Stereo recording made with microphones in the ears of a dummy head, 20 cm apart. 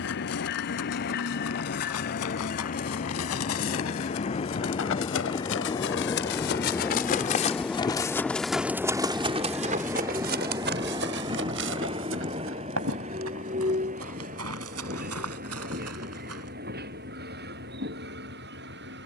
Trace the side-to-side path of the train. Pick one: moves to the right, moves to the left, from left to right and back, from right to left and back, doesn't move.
moves to the right.